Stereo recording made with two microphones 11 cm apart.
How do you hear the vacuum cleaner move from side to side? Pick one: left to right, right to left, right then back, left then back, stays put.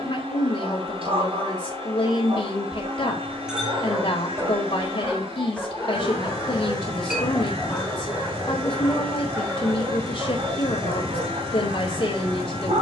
stays put.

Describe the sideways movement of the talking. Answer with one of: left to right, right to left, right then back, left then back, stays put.
stays put.